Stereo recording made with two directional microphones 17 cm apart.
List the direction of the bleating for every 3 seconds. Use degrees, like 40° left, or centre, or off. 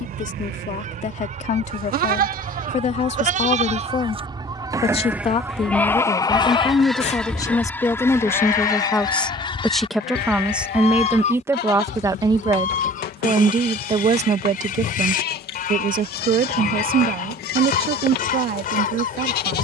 60° right, 20° right, 40° left, 70° left, 70° left, 70° left, 70° left.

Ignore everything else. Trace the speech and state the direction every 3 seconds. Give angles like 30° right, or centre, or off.
50° left, 40° left, 20° left, 10° right, 30° right, 60° right, 70° right.